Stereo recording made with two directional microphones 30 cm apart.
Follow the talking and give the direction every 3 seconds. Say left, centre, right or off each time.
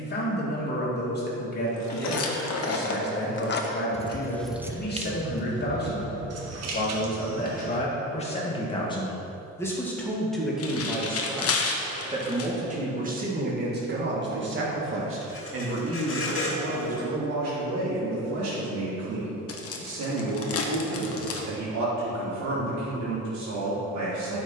left, left, left, centre, right, right, right, right.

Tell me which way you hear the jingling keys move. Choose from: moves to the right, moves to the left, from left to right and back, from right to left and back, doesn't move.
moves to the right.